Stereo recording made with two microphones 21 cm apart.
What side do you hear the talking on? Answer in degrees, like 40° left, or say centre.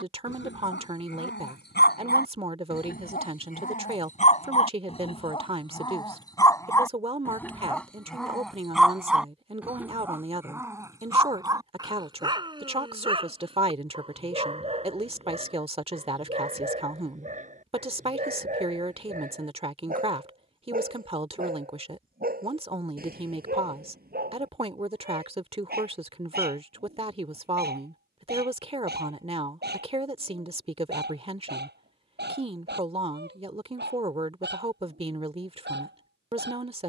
30° right.